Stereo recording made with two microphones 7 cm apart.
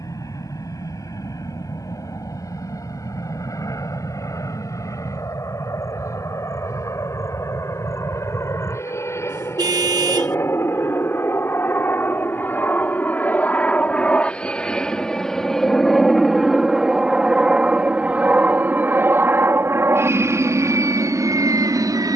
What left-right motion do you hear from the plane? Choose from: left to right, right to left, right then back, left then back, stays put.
left to right.